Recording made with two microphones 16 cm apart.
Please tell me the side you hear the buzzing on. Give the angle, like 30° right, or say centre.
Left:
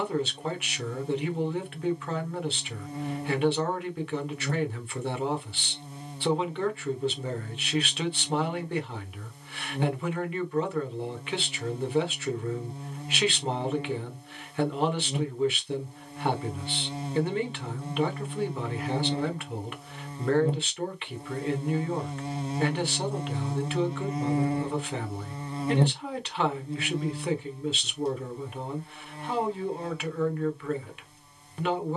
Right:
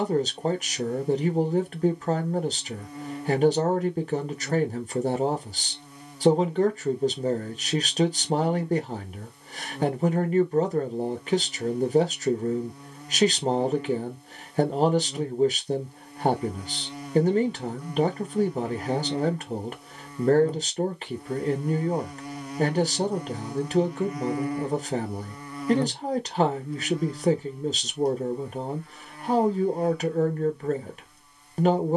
30° left.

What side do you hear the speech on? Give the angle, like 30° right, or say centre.
40° right.